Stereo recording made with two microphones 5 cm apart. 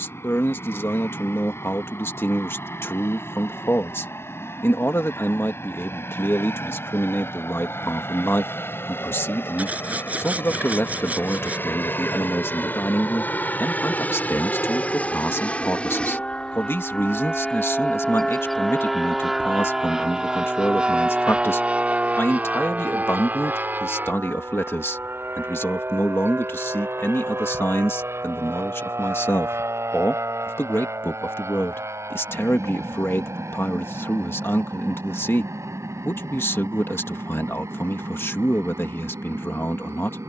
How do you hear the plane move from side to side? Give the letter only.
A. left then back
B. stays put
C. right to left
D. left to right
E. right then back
D.